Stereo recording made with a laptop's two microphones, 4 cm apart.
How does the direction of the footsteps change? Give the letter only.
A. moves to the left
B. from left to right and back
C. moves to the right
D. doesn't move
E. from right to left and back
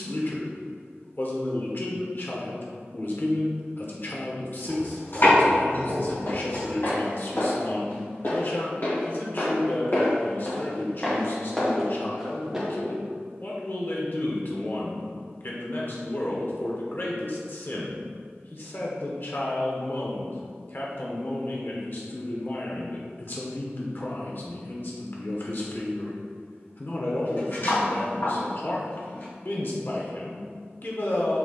C.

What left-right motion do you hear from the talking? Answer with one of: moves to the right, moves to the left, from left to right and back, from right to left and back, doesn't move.
doesn't move.